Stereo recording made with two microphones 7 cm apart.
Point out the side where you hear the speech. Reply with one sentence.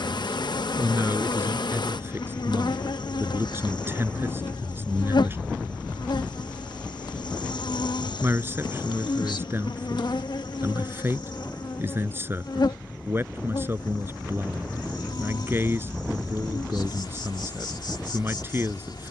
In this clip you hear the speech on the right.